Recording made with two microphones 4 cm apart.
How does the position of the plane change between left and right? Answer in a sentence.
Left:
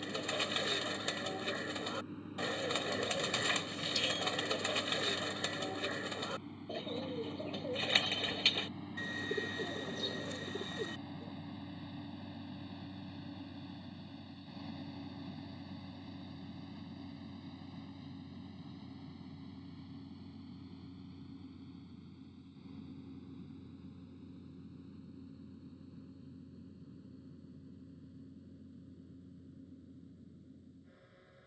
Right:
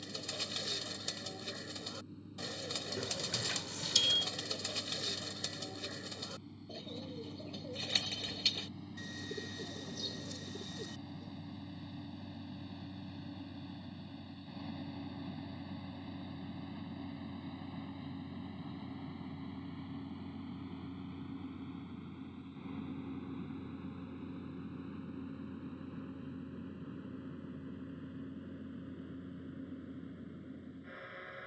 You can hear the plane move from left to right.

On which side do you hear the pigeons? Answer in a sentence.
In this clip you hear the pigeons on the left.